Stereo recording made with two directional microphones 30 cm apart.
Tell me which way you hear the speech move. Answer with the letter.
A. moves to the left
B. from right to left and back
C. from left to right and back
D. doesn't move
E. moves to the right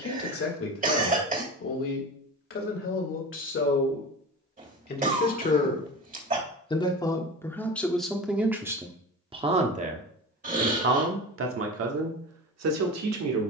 E.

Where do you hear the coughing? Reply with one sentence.
In this clip you hear the coughing on the right.